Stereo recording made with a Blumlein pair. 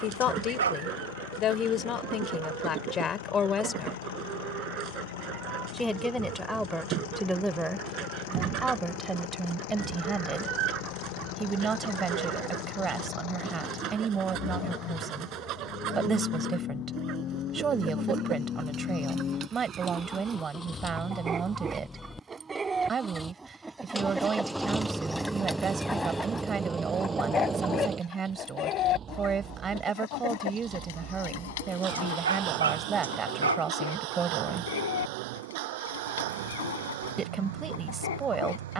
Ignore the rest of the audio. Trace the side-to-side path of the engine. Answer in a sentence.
In this clip you hear the engine travel towards the right.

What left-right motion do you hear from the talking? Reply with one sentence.
You can hear the talking go from the left side to the right.